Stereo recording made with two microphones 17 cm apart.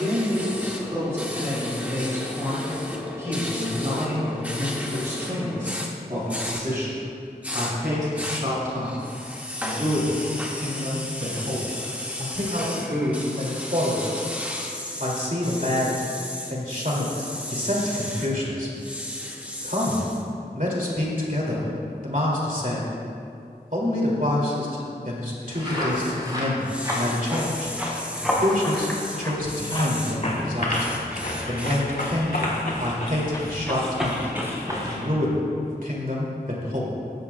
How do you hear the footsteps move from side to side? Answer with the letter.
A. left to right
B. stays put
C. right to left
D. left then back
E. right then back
D.